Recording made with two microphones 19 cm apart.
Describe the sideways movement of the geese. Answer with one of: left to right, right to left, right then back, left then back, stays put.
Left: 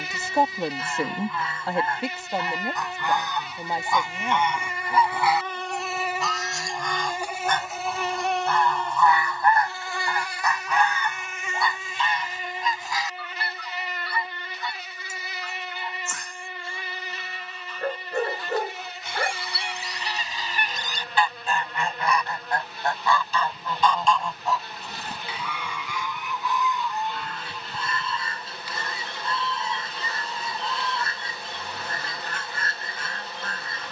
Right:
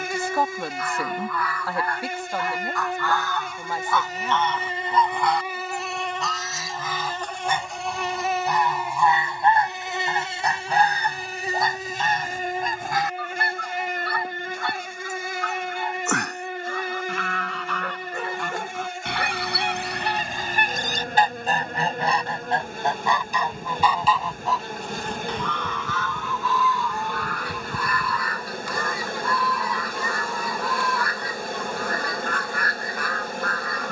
right then back.